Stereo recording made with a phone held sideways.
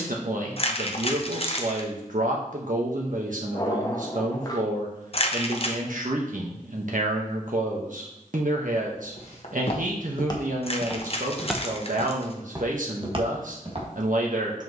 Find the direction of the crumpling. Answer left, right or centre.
left.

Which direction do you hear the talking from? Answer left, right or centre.
right.